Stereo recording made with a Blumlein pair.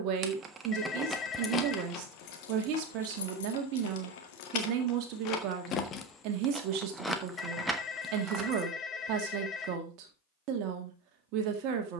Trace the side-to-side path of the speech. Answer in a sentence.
You can hear the speech stay put.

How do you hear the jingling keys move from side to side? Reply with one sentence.
In this clip you hear the jingling keys move from right to left and back again.